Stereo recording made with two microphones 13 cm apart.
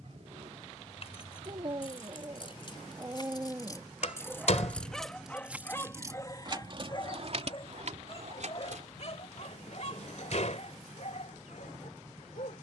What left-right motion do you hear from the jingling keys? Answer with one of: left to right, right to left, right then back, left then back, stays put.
left to right.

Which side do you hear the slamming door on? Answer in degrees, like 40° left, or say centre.
60° left.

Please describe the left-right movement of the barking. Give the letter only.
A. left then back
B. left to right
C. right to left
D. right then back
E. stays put
C.